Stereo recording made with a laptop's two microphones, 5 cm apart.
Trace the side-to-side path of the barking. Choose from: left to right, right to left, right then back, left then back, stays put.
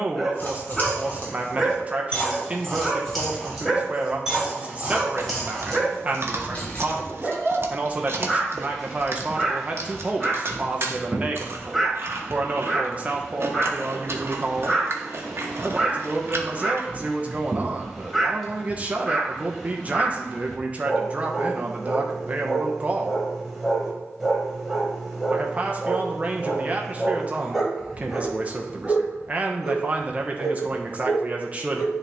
stays put.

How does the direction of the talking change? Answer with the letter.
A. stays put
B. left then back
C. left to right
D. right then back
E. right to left
A.